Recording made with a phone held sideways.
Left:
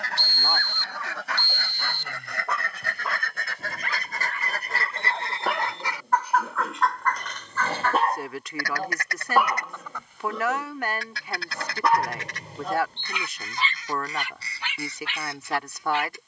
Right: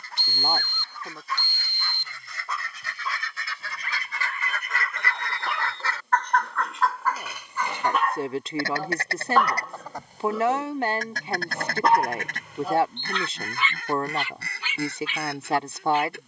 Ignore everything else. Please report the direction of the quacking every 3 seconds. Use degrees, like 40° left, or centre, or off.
70° left, 40° left, 10° right, 40° right, 50° right, 60° right.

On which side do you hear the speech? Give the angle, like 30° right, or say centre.
30° right.